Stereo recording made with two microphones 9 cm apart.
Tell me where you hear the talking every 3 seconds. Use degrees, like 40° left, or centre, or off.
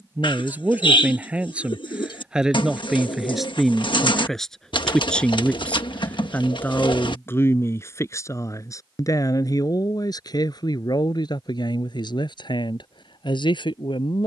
10° right, centre, 30° left, 50° left, 60° left.